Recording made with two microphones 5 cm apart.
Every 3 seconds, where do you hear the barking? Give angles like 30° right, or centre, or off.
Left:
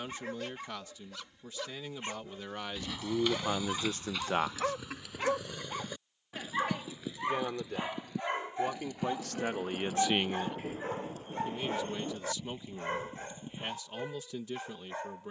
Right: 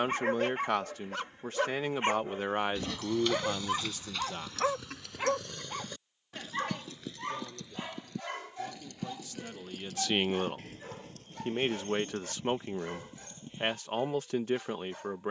50° right, 20° right, 20° left, 30° left, 40° left.